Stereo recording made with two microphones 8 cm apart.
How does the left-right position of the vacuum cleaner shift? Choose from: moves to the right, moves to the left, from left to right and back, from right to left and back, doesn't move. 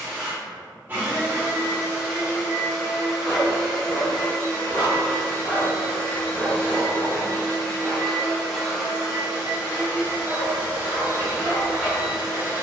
from right to left and back.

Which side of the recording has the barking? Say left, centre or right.
left.